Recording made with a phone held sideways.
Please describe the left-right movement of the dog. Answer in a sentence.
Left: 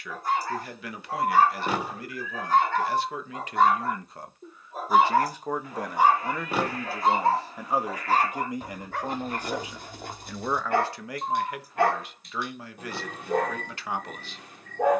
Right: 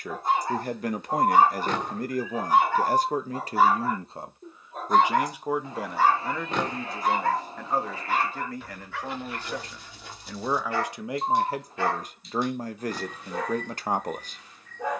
In this clip you hear the dog move from right to left.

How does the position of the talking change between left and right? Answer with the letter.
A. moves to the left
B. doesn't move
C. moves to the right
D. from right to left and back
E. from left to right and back
D.